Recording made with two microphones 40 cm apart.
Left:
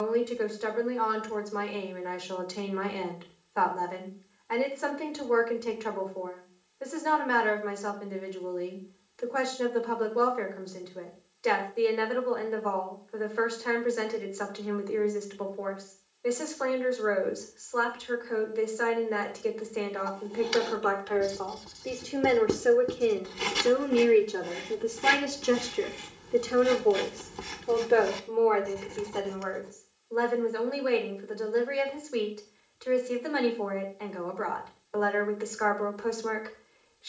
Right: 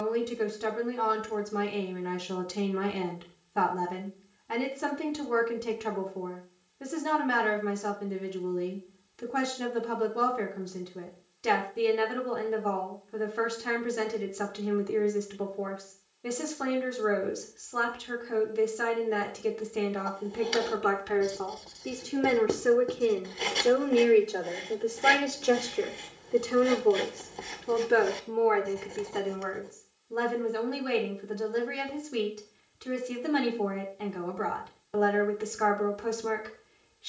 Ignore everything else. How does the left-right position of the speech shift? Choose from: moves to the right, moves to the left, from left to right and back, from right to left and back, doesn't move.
from right to left and back.